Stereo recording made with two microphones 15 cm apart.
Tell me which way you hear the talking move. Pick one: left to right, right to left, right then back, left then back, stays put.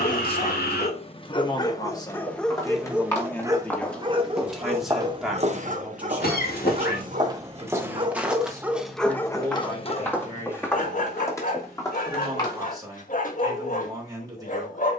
left to right.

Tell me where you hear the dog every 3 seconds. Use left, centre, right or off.
left, right, right, left, left.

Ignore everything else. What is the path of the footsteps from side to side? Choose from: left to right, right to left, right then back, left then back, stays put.
right then back.